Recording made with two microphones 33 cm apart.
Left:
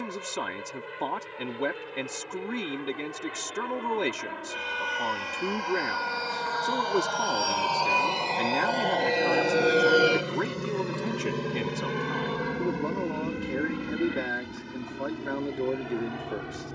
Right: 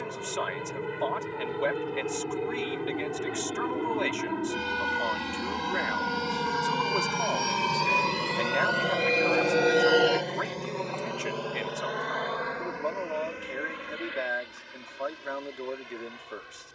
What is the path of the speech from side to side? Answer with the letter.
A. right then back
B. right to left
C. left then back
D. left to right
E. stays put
E.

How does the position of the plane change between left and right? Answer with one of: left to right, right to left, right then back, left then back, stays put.
right to left.